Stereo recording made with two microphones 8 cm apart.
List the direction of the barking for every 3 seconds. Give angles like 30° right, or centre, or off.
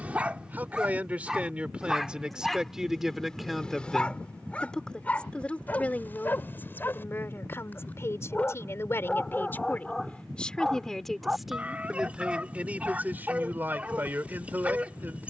10° right, 10° left, 20° left, centre, 20° right.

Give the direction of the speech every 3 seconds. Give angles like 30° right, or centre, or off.
20° right, 10° left, 30° left, 10° left, 20° right.